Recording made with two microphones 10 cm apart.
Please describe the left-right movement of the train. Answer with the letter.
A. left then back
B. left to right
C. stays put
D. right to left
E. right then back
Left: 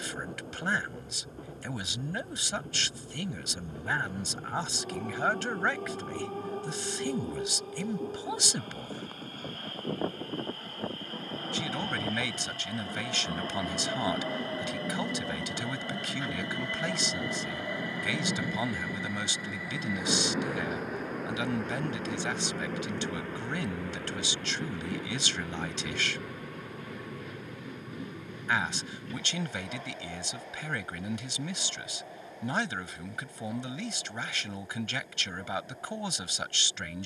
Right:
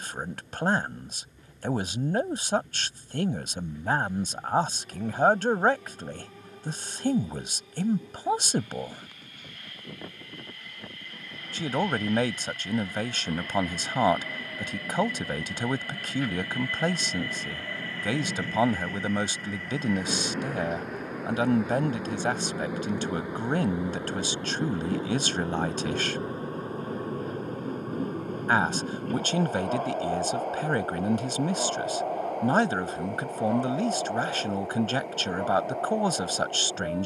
B.